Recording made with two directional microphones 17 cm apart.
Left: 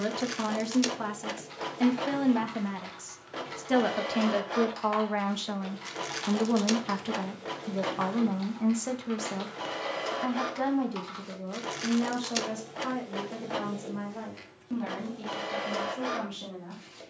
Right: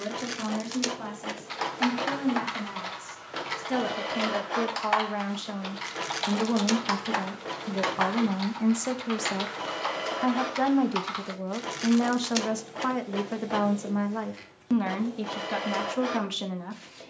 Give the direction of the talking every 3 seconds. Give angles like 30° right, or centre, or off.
40° left, 20° left, centre, 30° right, 50° right, 60° right.